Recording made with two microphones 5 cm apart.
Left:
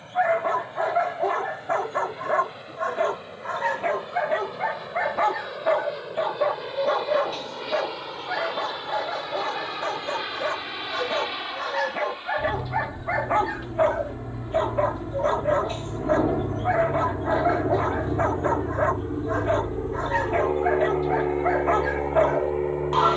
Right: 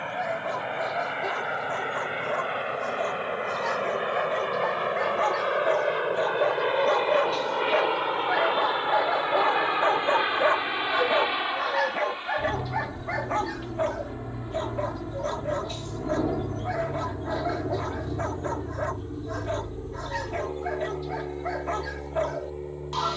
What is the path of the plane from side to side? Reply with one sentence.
You can hear the plane move to the left.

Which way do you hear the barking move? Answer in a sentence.
You can hear the barking move from left to right and back again.